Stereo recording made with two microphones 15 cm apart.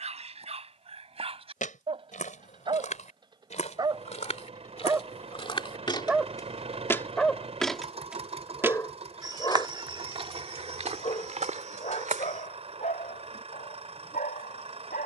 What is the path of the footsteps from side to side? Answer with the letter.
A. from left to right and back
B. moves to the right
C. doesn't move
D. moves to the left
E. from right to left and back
B.